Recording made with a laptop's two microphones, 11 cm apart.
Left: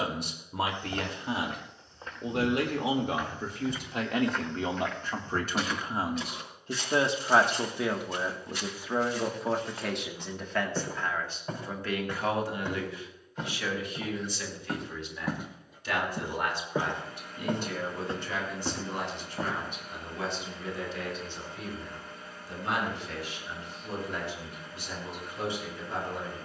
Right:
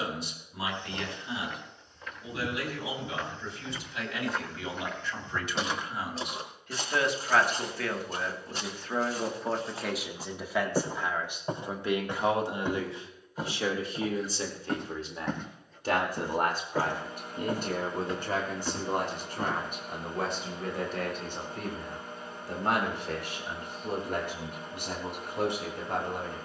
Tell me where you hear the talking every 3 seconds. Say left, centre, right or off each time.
left, left, left, centre, right, right, right, right, right.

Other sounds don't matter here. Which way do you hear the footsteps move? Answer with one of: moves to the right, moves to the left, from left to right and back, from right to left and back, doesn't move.
from left to right and back.